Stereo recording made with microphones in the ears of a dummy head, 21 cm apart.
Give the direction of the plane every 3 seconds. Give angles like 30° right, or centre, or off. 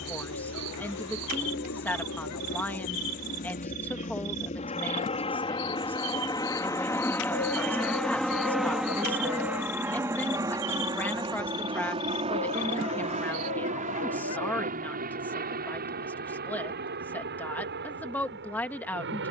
50° left, 30° left, 10° left, 10° right, 30° right, 40° right, 50° right.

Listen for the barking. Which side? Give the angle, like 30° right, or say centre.
70° left.